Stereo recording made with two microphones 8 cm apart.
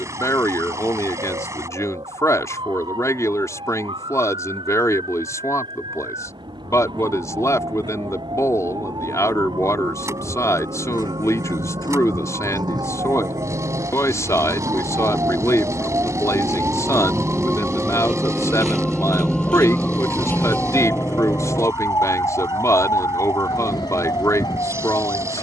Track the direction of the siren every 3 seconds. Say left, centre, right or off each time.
right, right, right, right, right, right, centre, left, left.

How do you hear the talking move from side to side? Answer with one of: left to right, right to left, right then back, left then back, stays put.
stays put.